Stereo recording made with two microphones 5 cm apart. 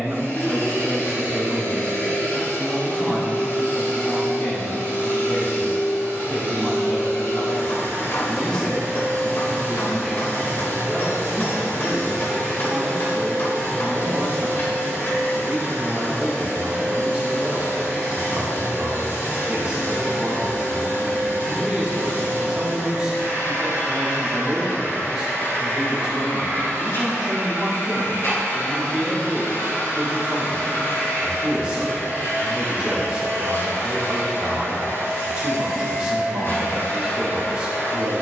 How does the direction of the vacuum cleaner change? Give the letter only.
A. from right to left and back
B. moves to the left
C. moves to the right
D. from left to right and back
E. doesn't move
E.